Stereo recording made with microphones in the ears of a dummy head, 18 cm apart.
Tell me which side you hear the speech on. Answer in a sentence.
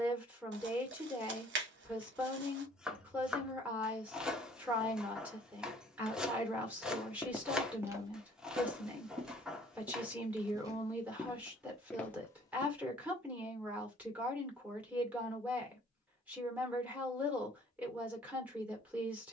In this clip you hear the speech in the centre.